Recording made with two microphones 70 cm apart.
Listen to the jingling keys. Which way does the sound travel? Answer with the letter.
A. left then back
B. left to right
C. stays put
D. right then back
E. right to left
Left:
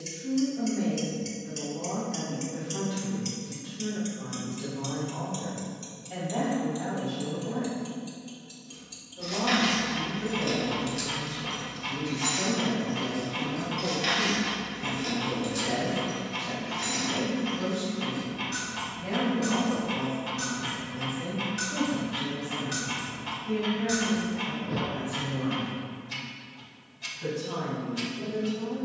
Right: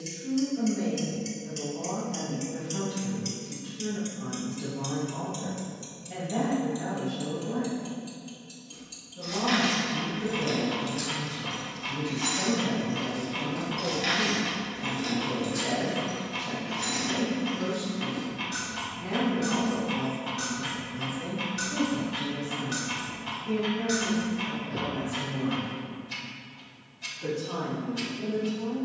D.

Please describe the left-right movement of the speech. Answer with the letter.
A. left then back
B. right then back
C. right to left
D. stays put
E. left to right
C.